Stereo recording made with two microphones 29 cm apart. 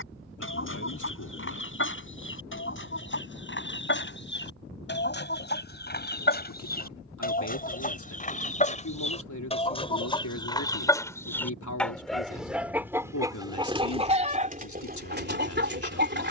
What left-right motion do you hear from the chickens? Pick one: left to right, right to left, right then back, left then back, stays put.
left to right.